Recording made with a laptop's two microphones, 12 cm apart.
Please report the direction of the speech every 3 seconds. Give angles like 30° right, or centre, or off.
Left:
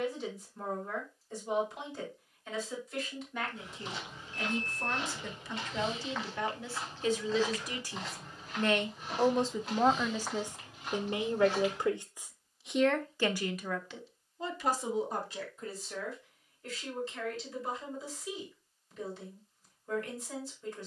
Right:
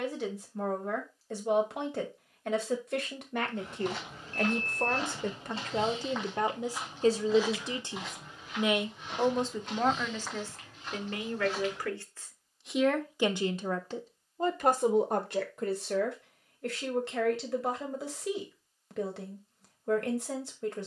80° right, 60° right, 30° right, 10° left, 30° right, 70° right, 70° right.